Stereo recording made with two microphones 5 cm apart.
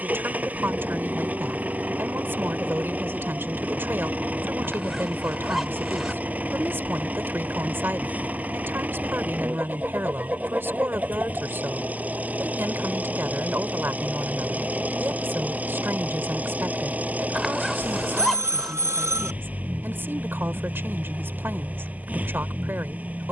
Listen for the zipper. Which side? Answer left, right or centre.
centre.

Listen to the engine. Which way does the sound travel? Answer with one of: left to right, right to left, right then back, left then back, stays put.
stays put.